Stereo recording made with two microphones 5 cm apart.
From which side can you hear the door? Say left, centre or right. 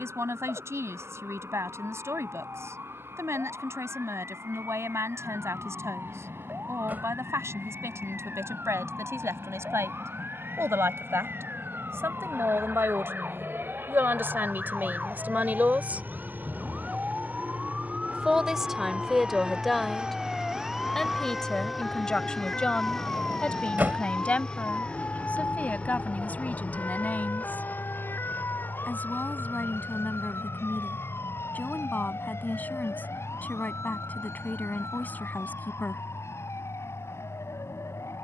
right.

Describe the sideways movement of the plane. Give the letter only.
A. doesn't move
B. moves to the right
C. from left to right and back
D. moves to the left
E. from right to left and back
D.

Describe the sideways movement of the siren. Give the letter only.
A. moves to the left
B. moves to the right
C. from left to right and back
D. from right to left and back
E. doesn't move
A.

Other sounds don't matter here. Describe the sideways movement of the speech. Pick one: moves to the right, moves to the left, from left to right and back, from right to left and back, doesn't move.
moves to the left.